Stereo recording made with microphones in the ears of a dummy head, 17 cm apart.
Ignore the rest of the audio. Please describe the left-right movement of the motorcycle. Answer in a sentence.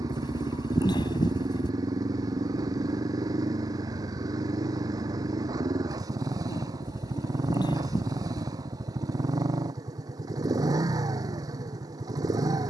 You can hear the motorcycle stay put.